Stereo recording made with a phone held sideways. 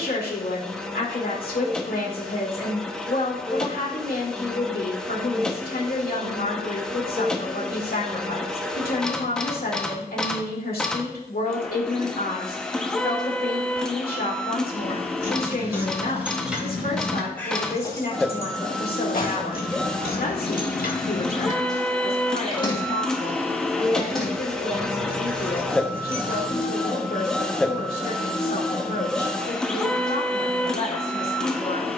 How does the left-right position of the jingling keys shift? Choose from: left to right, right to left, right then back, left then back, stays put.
left then back.